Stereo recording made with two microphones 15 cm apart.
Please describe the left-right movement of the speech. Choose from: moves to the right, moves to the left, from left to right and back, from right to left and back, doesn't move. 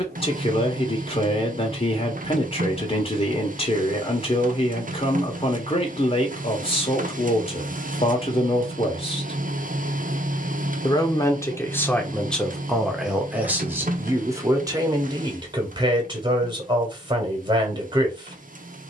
moves to the right.